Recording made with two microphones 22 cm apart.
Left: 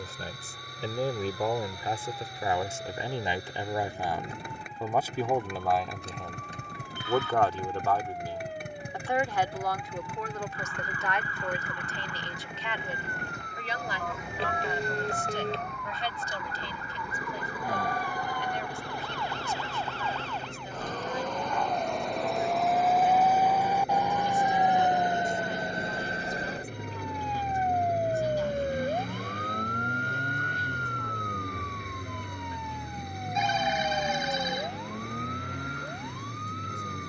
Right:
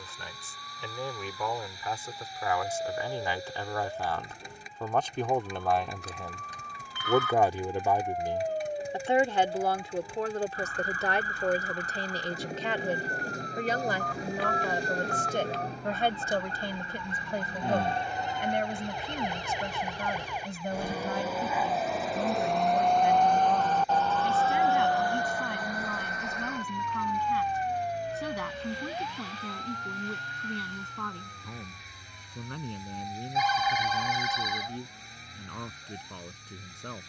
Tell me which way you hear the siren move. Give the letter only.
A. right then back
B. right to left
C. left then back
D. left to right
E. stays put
B.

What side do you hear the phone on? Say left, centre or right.
left.